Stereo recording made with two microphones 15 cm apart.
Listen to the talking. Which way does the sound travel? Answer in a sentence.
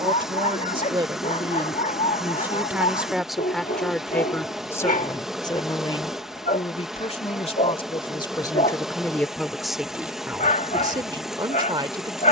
In this clip you hear the talking go left and come back.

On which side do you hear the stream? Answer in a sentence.
In this clip you hear the stream in the centre.